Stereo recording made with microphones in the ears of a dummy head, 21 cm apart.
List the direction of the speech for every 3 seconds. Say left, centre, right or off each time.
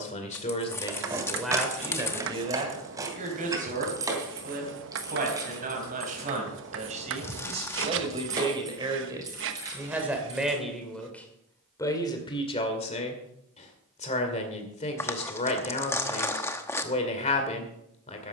centre, right, right, centre, left, left.